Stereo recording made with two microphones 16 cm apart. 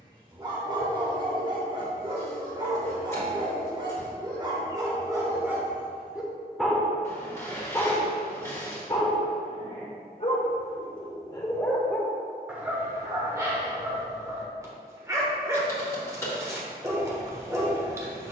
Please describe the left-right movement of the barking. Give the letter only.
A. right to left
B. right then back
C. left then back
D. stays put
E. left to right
C.